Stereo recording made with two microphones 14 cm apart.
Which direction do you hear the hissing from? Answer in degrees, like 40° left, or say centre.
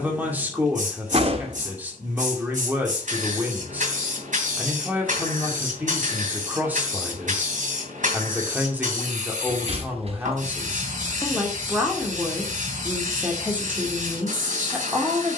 60° right.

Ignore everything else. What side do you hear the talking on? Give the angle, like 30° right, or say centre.
10° right.